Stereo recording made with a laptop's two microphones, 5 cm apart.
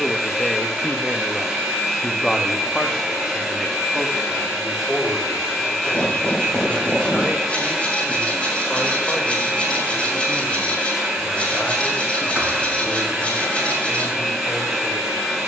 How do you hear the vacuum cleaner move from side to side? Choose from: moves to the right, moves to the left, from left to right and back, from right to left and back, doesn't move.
doesn't move.